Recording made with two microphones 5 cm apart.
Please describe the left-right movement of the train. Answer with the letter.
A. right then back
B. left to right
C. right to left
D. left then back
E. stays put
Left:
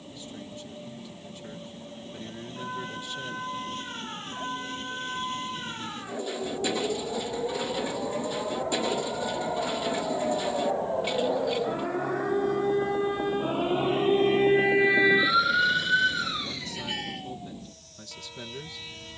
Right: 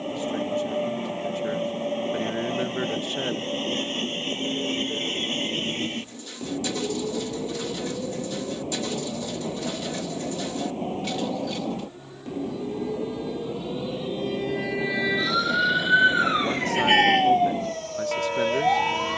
E.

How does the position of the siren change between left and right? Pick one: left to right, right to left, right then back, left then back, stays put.
left to right.